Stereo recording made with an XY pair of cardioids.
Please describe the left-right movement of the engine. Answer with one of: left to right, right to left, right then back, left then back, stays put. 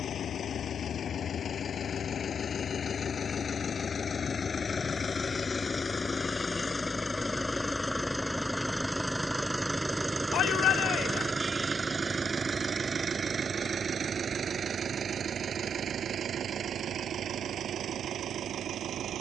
left to right.